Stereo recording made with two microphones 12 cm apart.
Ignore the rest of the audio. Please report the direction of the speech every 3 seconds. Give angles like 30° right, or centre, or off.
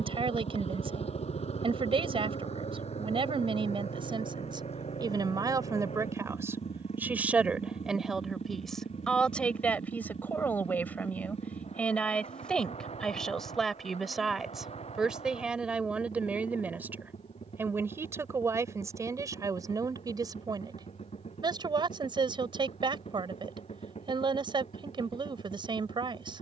50° right, 40° right, 10° right, 10° left, centre, 10° right, 30° right, 40° right, 40° right.